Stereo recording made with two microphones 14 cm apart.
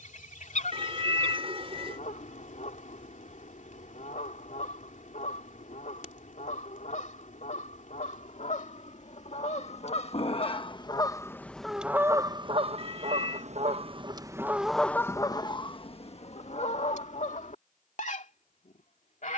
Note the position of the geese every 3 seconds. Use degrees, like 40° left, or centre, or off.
60° left, 60° left, 60° left, 30° left, 30° right, 50° left, 60° left.